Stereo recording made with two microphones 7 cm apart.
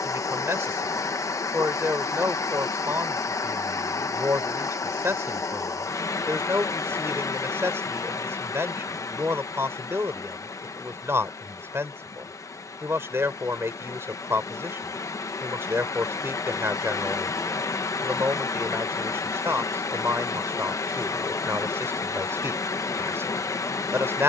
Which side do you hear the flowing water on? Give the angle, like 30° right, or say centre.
50° left.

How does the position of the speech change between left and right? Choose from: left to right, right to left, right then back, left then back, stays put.
stays put.